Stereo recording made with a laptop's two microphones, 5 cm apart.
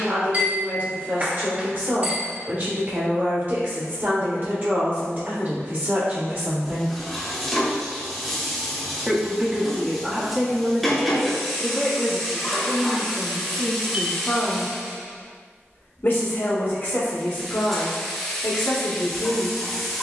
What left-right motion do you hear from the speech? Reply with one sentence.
You can hear the speech travel towards the left.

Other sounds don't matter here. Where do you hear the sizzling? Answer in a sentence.
In this clip you hear the sizzling in the centre.